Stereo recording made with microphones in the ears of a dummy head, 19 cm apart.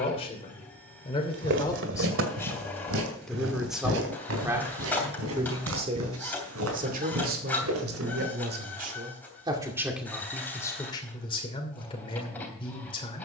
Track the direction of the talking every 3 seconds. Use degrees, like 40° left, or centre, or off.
20° left, 10° right, 40° right, 10° left, 30° left.